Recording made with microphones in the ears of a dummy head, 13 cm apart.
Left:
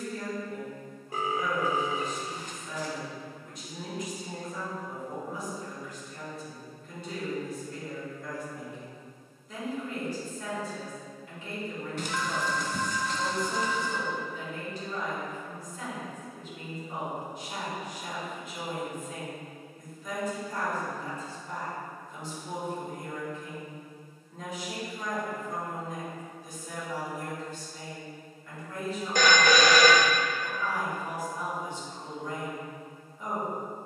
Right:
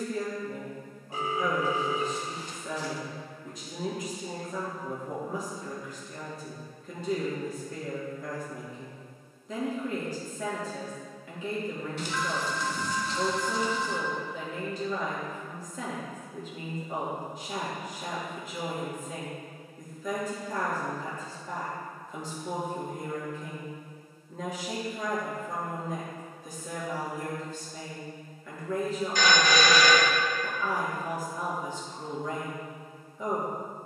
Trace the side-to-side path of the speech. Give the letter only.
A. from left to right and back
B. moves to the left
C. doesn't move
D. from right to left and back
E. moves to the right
C.